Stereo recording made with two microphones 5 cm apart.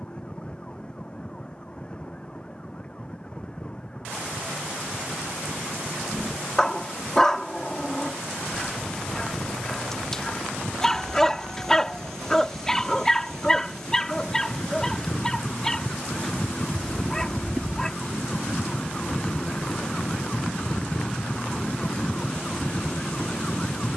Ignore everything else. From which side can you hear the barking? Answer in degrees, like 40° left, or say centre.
10° left.